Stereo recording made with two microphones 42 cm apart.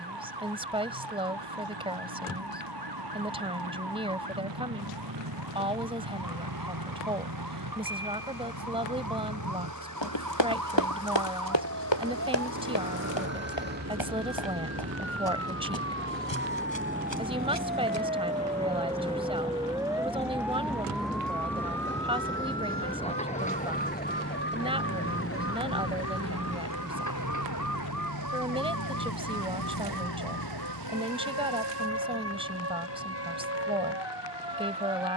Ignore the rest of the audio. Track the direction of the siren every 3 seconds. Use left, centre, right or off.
right, right, right, right, right, right, centre, centre, left, left, left, left.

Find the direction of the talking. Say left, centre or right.
centre.